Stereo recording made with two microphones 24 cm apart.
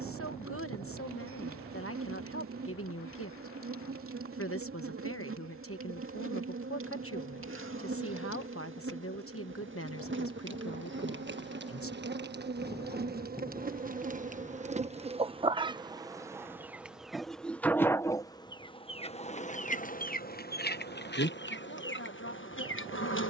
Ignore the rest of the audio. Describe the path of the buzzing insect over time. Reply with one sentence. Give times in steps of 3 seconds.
In this clip you hear the buzzing insect on the right from 0 s, in the centre from 15 s and on the left from 18 s.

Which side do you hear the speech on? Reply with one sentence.
You can hear the speech on the left.